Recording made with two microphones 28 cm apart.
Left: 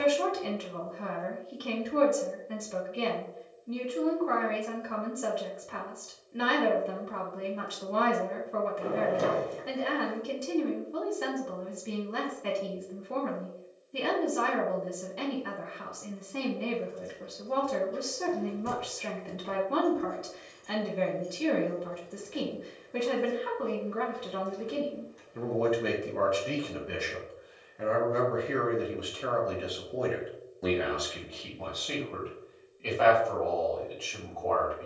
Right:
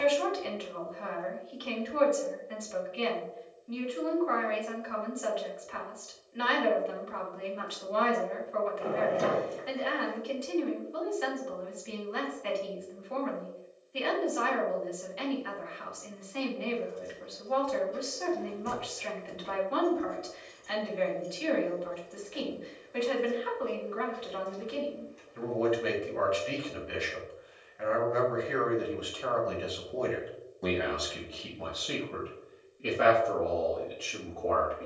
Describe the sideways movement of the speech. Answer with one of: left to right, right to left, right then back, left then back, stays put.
left to right.